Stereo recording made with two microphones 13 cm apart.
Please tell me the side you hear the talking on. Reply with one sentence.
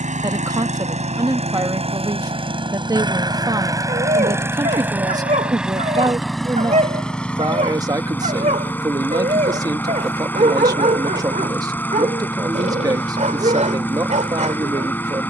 You can hear the talking on the right.